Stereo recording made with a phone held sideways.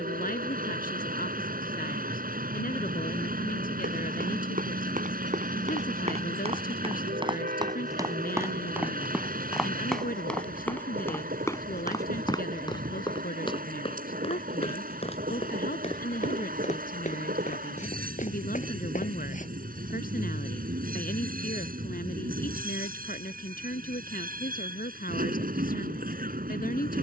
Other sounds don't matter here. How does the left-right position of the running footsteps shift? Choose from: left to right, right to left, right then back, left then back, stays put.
right to left.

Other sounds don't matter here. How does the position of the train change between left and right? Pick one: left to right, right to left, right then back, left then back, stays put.
stays put.